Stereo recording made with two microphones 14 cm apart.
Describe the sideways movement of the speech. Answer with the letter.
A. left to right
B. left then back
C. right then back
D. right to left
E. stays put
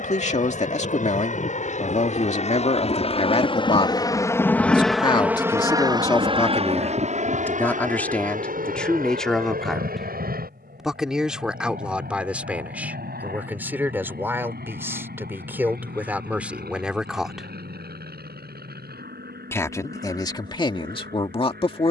C.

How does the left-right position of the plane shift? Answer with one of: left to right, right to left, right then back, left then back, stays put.
left to right.